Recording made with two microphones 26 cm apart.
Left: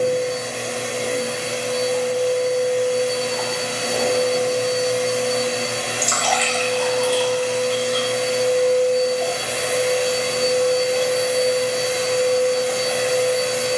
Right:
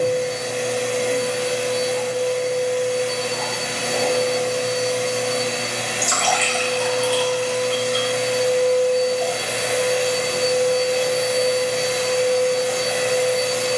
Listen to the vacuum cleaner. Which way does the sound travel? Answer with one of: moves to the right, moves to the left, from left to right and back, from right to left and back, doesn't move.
doesn't move.